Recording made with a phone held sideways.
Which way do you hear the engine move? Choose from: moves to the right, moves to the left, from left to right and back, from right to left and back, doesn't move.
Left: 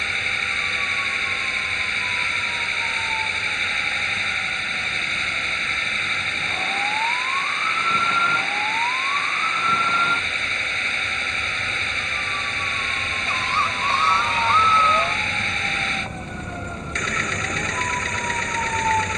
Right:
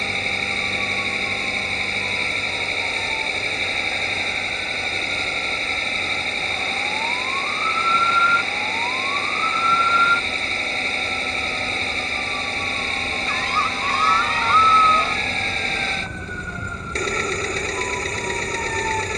doesn't move.